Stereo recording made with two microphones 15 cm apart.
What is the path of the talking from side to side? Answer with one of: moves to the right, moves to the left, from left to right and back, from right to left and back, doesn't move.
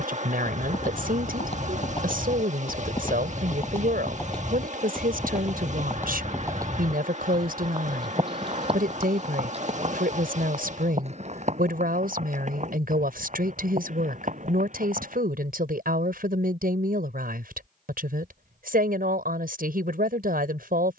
doesn't move.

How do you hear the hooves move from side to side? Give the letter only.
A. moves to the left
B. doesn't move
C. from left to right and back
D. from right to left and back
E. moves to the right
E.